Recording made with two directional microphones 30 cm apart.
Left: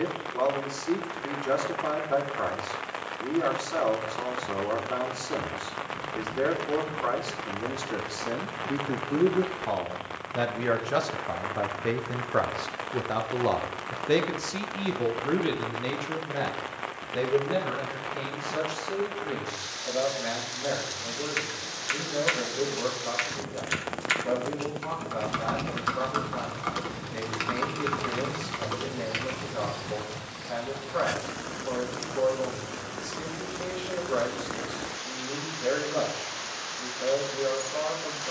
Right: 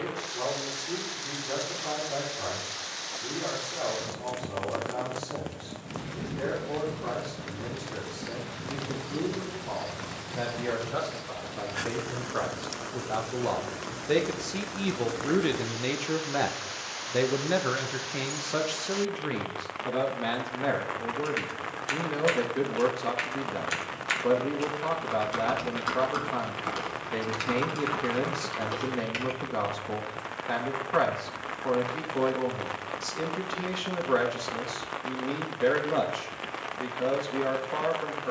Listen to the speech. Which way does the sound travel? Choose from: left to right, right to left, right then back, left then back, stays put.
left to right.